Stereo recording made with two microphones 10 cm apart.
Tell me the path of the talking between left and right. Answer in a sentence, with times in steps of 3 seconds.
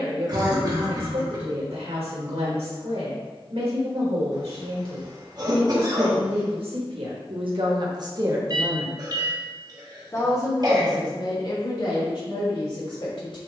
In this clip you hear the talking on the right from 0 s and on the left from 9 s.